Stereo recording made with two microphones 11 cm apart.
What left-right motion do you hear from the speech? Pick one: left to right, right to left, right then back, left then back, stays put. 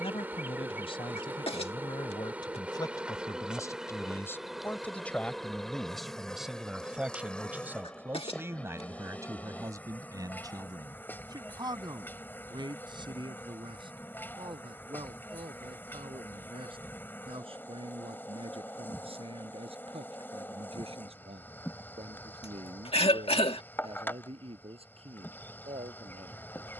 left to right.